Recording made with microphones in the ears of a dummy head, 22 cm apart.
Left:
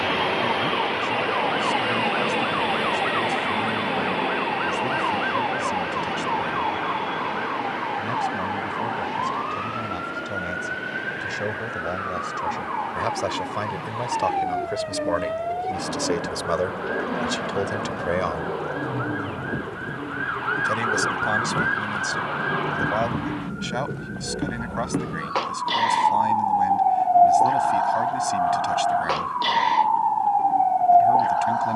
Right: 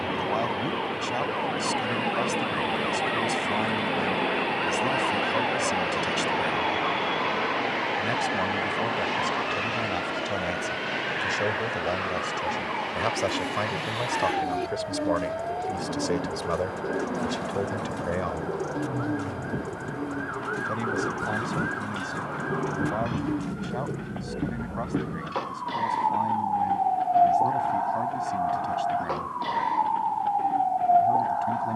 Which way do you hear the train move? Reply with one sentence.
In this clip you hear the train move to the right.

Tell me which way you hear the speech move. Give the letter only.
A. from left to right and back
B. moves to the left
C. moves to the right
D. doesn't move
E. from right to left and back
B.